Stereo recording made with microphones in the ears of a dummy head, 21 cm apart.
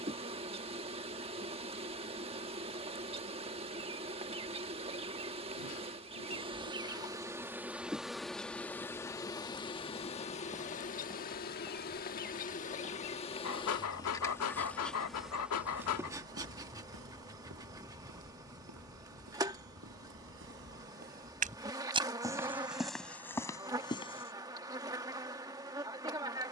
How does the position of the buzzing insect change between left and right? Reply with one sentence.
In this clip you hear the buzzing insect move from right to left and back again.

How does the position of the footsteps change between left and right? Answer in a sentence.
You can hear the footsteps go right and come back.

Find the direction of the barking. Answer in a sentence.
You can hear the barking on the left.